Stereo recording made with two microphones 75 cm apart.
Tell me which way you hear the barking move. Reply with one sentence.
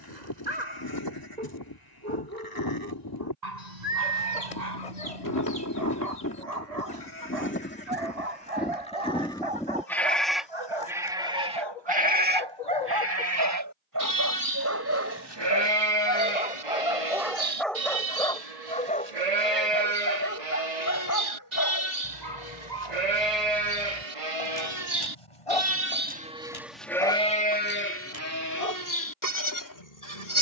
You can hear the barking move to the left.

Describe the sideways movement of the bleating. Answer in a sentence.
You can hear the bleating move from left to right and back again.